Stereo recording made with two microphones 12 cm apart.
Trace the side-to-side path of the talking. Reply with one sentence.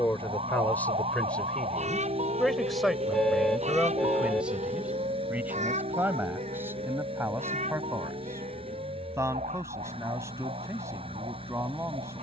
In this clip you hear the talking travel towards the right.